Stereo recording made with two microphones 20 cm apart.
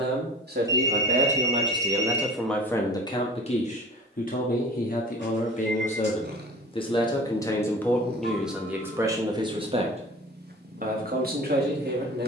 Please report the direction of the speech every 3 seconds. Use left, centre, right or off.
right, left, centre, right.